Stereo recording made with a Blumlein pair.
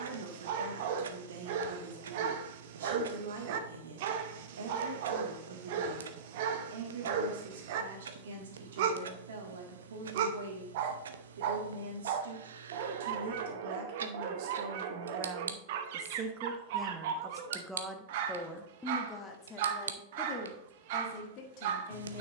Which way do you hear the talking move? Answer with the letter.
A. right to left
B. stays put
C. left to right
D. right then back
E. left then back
A.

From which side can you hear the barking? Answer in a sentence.
In this clip you hear the barking on the right.